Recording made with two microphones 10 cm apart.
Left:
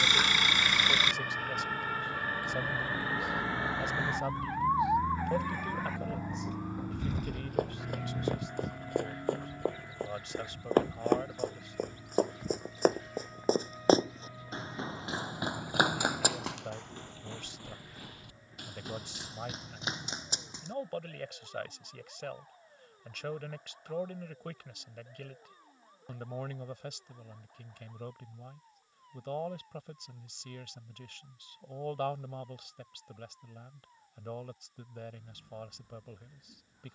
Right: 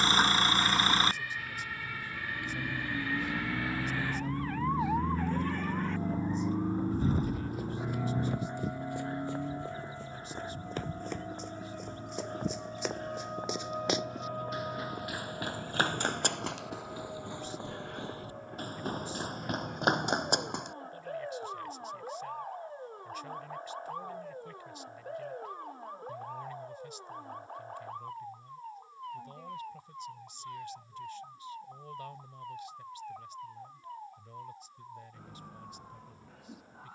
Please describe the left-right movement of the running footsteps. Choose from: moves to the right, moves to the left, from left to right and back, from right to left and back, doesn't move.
moves to the right.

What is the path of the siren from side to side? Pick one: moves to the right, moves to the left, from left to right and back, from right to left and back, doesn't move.
moves to the right.